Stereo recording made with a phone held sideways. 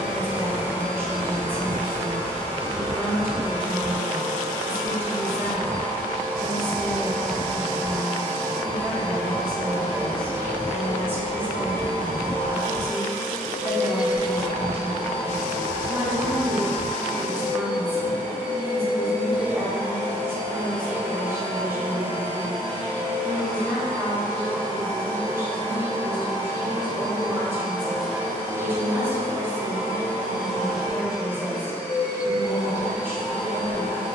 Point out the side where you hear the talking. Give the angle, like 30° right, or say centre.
10° right.